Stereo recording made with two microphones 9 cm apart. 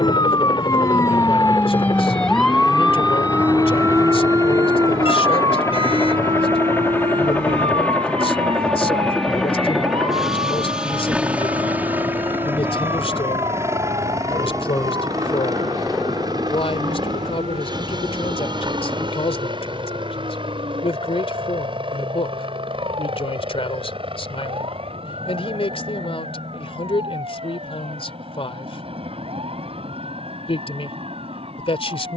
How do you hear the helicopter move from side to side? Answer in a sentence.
In this clip you hear the helicopter move from left to right.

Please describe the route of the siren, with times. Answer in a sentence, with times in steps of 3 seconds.
You can hear the siren on the left from 0 s and on the right from 3 s.